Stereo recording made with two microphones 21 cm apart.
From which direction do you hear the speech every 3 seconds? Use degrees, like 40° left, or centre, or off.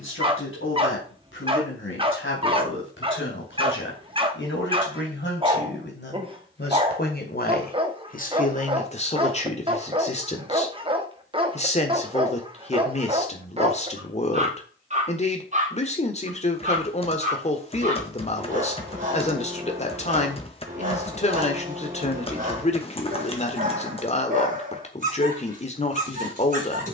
70° left, 60° left, 40° left, 30° left, 30° left, 30° left, 30° left, 30° left, 30° left.